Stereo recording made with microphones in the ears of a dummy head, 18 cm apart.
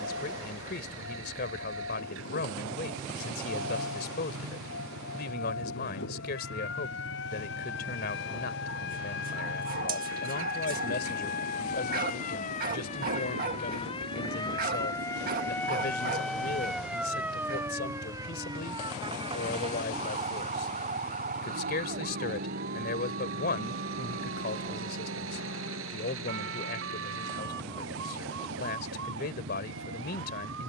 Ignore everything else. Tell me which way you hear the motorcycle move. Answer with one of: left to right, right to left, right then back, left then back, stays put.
stays put.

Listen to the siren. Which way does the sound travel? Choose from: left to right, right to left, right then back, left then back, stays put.
left to right.